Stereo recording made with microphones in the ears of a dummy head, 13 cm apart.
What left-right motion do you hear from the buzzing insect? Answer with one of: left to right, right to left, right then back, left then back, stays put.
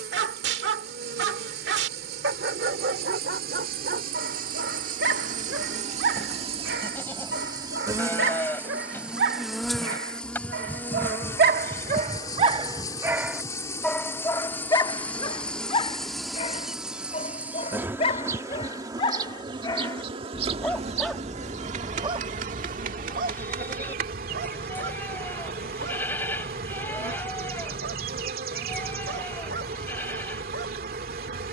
left then back.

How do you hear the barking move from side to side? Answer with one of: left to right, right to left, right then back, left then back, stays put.
left then back.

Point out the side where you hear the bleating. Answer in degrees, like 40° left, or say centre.
10° left.